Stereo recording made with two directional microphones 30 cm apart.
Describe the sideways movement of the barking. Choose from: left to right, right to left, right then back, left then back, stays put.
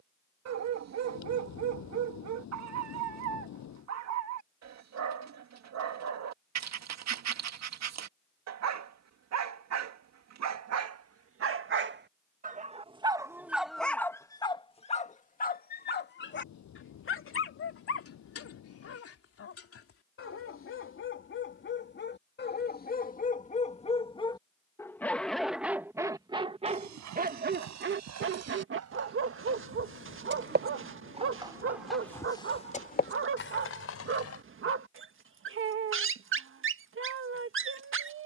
left then back.